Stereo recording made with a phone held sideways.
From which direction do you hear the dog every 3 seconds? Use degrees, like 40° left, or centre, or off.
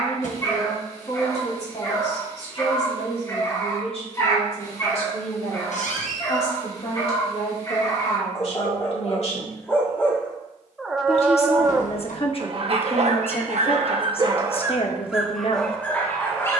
20° left, 20° left, 20° left, centre, 40° right, 10° left.